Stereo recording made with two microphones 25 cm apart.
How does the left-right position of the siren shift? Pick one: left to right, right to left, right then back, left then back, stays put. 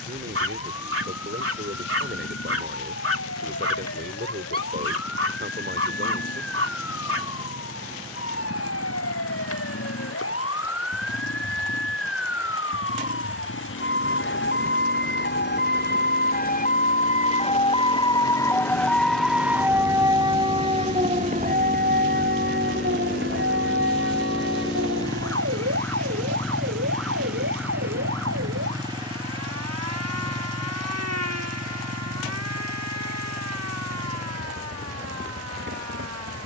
left to right.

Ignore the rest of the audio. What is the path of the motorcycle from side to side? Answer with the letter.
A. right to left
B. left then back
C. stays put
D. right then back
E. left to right
E.